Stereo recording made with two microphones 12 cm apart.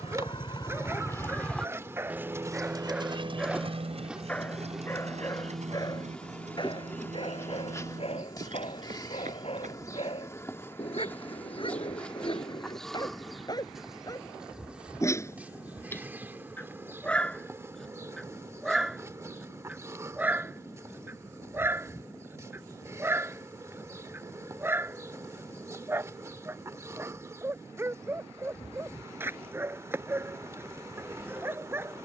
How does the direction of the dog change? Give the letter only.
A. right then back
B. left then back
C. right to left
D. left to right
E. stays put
B.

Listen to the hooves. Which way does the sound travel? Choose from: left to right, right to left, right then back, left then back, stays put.
left to right.